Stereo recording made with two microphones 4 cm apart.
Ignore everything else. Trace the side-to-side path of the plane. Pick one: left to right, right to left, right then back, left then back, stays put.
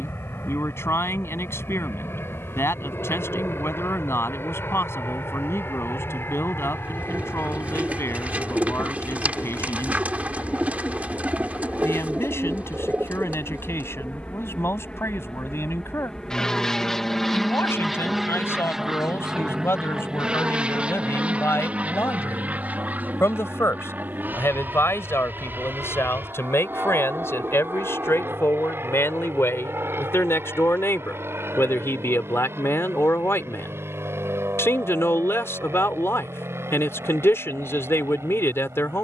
left to right.